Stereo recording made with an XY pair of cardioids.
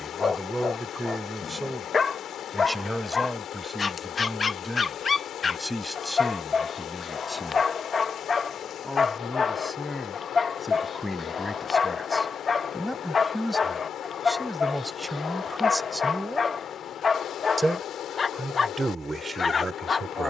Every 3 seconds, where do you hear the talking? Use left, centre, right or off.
centre, centre, centre, centre, centre, centre, right.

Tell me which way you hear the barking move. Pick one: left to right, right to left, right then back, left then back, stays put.
stays put.